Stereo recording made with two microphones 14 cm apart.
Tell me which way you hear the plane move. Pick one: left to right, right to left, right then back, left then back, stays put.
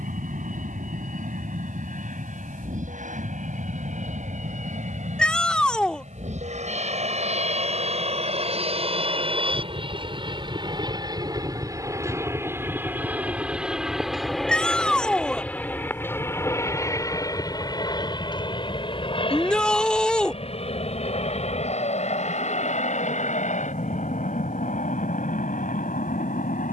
right to left.